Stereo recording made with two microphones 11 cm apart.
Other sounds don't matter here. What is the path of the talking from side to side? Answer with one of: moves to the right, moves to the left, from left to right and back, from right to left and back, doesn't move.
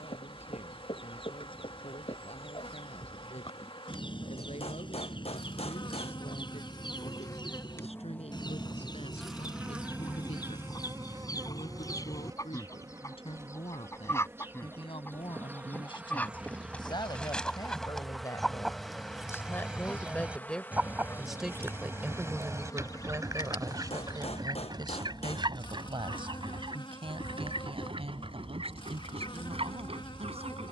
moves to the right.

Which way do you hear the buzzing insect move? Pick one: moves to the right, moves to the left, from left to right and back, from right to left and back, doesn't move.
from left to right and back.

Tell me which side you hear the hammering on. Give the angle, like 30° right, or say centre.
70° left.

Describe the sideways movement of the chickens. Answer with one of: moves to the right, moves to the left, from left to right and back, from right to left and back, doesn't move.
moves to the right.